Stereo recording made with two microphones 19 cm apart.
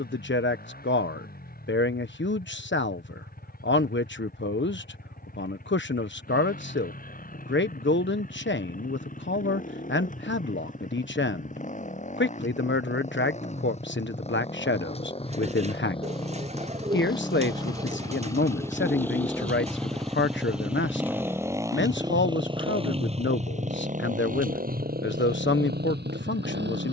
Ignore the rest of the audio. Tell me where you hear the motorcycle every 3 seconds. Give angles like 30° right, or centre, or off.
50° left, 50° left, 50° left, 40° left, 40° left, 30° left, 10° left, 30° right, 60° right.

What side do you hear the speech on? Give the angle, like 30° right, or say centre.
80° left.